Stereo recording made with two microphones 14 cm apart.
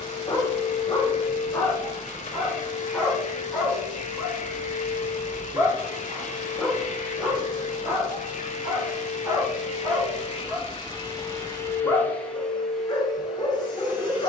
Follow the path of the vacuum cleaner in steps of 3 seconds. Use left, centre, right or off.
left, left, left, left, centre.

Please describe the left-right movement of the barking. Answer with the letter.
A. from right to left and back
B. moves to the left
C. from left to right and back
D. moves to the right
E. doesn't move
C.